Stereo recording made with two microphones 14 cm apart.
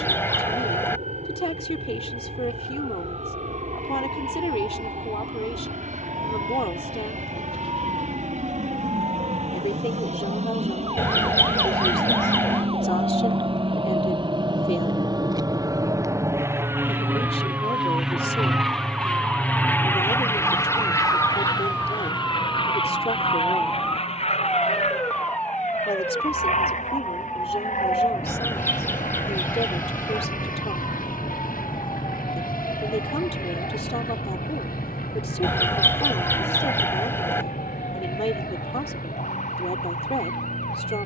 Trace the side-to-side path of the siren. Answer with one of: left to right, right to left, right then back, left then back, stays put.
right to left.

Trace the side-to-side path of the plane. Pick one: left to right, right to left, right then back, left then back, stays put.
right to left.